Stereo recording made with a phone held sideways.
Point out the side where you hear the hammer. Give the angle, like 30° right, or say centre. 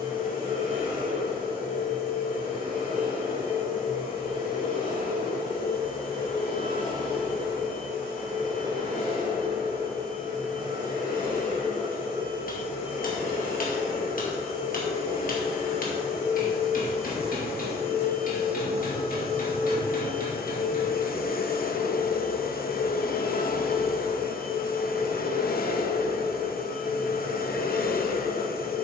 60° left.